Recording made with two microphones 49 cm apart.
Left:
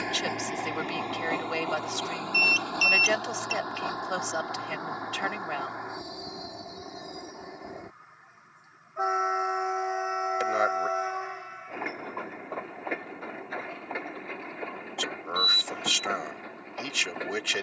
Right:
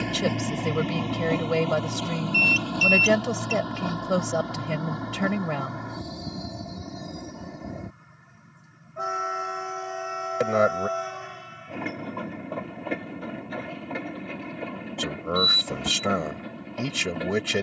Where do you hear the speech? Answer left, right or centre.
right.